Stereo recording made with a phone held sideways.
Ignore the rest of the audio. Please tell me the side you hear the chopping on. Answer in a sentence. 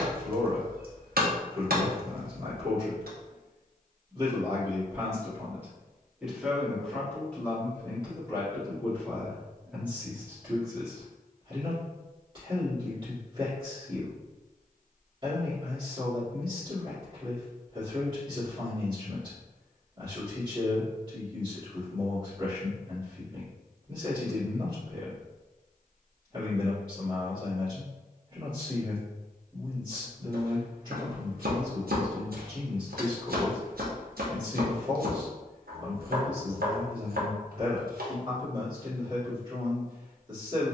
You can hear the chopping on the right.